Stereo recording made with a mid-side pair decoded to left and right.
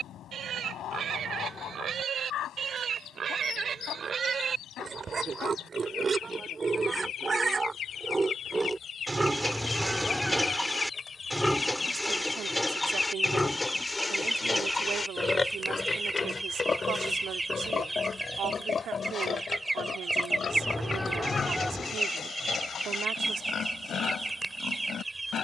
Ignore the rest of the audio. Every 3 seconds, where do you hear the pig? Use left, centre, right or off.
right, right, right, centre, centre, left, left, left, left.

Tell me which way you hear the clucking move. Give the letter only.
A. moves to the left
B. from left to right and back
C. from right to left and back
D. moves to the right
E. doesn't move
D.